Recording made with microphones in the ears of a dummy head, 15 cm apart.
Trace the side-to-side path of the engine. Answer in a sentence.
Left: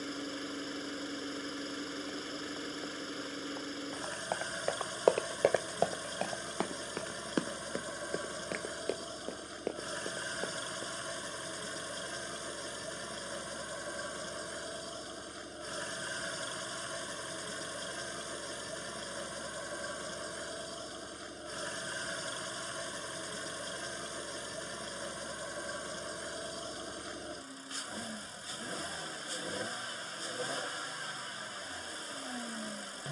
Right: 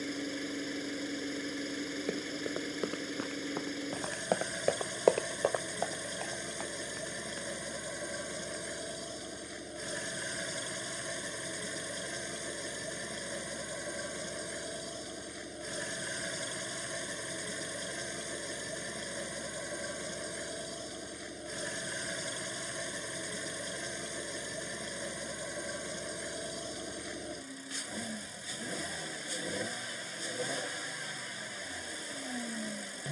In this clip you hear the engine stay in one place.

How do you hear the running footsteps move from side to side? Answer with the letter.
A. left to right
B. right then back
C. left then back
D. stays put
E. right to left
E.